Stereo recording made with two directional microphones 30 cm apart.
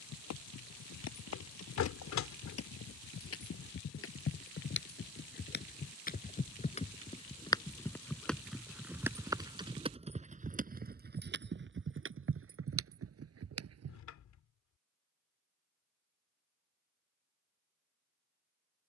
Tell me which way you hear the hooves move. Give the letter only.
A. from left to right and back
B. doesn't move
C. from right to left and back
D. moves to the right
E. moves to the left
D.